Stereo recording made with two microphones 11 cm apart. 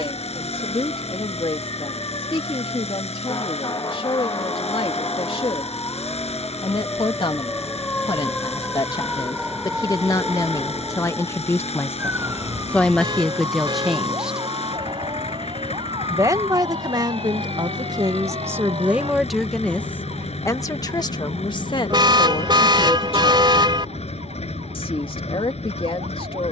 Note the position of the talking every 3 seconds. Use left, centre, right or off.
left, left, left, left, centre, right, centre, left, left.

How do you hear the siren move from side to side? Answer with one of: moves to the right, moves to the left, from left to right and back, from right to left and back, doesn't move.
moves to the right.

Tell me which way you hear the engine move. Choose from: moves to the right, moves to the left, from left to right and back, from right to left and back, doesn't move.
doesn't move.